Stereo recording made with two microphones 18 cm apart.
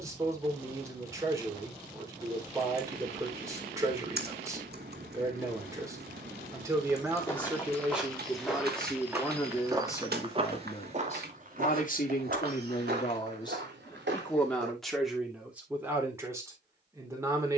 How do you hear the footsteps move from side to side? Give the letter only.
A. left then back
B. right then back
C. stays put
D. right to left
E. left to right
E.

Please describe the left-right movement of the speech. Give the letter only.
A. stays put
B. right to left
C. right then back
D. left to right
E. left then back
E.